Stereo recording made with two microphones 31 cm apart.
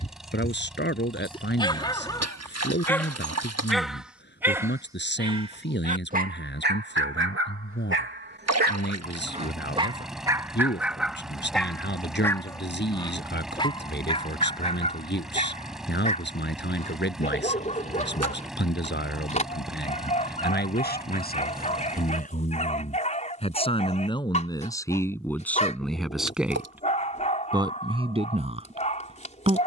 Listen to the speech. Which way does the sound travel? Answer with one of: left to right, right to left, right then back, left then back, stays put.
left to right.